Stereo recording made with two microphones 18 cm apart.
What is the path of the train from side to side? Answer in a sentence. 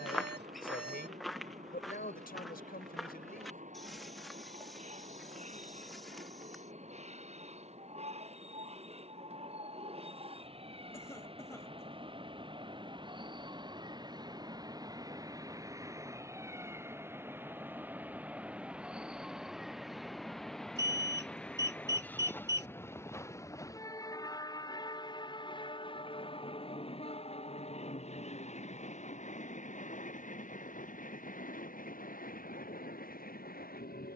In this clip you hear the train move to the left.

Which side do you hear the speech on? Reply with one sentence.
You can hear the speech on the left.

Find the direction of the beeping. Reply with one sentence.
In this clip you hear the beeping on the right.